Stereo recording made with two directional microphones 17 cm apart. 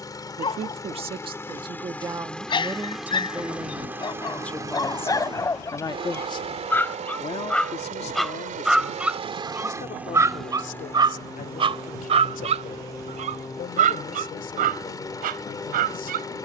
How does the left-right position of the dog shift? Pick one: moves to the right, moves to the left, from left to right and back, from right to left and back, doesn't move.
moves to the right.